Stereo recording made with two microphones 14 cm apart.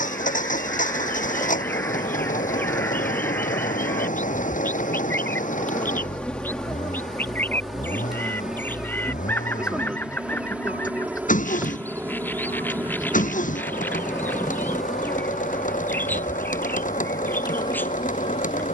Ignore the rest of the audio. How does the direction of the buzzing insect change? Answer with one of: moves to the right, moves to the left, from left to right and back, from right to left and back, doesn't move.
from left to right and back.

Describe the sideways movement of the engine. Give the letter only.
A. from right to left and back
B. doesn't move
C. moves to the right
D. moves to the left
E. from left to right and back
B.